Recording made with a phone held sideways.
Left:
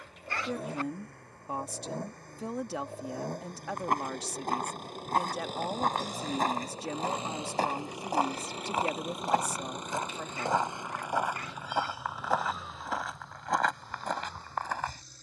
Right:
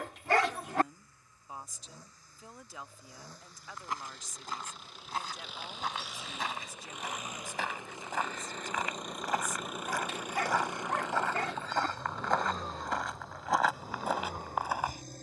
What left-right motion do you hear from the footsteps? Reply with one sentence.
You can hear the footsteps move to the right.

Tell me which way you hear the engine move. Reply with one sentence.
You can hear the engine move to the right.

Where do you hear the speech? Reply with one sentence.
You can hear the speech on the left.